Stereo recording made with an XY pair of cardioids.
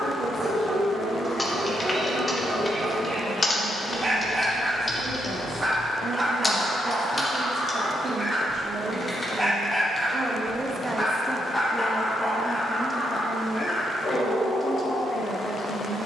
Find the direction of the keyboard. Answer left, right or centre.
left.